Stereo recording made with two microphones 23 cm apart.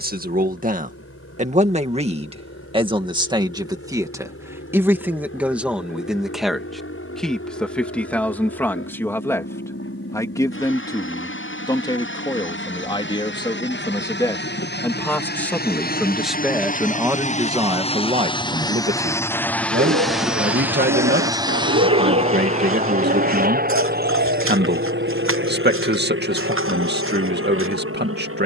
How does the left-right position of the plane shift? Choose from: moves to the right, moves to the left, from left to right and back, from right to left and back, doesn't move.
moves to the right.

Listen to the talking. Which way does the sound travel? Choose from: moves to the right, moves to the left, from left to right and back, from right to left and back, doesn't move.
from right to left and back.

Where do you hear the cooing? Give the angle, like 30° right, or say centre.
60° right.